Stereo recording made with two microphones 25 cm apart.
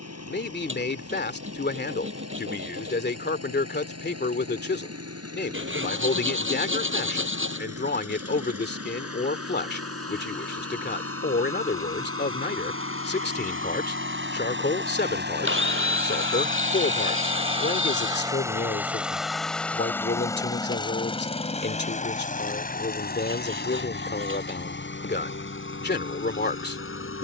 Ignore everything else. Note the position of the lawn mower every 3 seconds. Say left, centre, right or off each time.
right, right, right, right, right, right, centre, left, left.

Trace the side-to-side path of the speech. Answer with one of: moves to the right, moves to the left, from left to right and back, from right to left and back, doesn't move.
doesn't move.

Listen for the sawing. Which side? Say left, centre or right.
right.